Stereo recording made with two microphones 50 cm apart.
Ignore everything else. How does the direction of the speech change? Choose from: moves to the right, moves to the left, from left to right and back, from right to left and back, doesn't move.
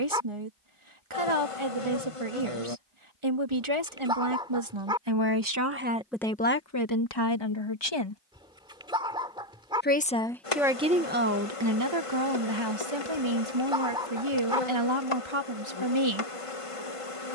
from right to left and back.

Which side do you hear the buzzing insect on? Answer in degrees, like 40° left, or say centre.
70° left.